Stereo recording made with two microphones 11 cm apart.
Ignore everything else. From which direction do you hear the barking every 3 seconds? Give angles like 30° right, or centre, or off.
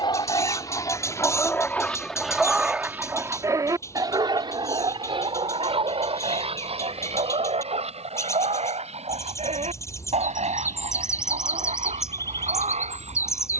20° left, 40° right, 70° right, 80° right, 80° right.